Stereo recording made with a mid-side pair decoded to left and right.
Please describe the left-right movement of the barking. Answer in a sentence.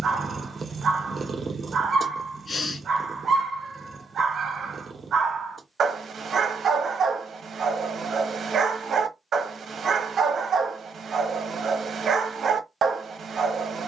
You can hear the barking stay put.